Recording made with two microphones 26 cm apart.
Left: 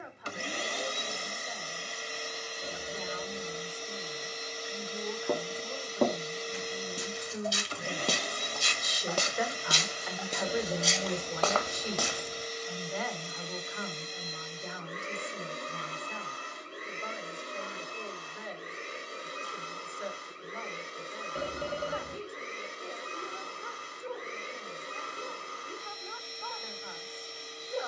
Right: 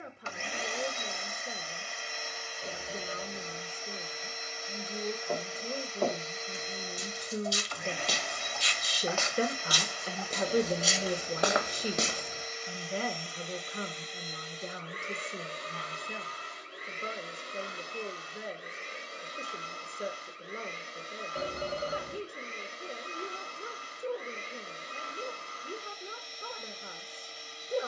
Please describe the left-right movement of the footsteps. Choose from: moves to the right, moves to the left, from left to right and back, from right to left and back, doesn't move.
moves to the right.